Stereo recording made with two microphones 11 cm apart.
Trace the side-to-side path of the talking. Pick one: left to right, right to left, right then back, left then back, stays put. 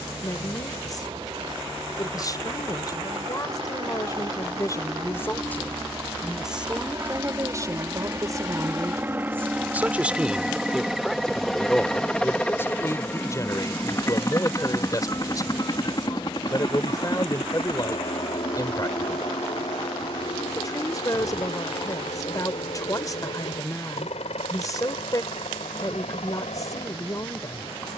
right then back.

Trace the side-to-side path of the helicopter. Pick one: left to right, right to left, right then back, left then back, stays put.
right to left.